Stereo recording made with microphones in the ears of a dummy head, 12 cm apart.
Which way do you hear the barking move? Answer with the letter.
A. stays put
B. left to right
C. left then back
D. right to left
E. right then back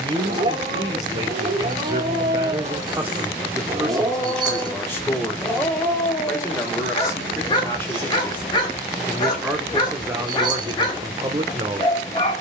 D.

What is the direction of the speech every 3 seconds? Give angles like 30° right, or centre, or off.
30° right, 10° left, 20° left, 20° right.